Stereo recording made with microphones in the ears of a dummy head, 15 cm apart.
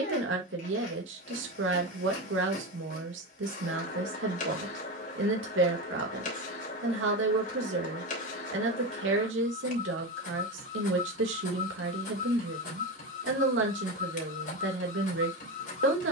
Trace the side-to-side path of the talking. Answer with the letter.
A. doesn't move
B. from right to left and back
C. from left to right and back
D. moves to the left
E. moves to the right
A.